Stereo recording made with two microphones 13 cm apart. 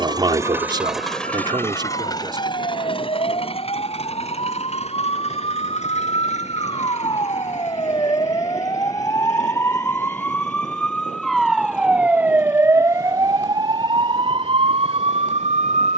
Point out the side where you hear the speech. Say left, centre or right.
right.